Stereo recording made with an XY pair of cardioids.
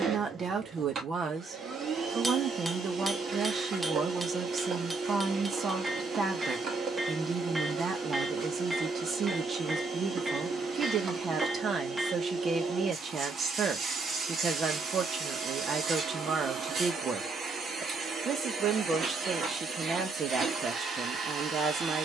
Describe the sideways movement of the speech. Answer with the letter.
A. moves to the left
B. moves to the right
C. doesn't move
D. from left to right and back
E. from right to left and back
C.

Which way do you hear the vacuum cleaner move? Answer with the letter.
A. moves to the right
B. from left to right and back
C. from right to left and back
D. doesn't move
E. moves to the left
D.